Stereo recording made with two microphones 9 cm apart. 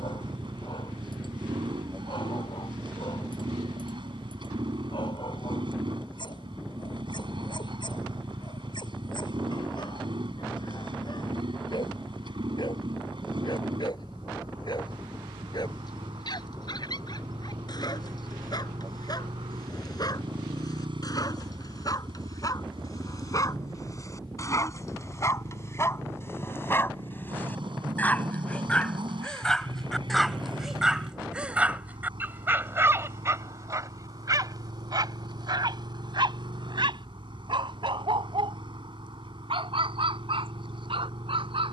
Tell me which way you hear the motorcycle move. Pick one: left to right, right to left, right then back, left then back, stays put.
stays put.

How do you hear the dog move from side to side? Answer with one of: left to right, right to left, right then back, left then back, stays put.
left to right.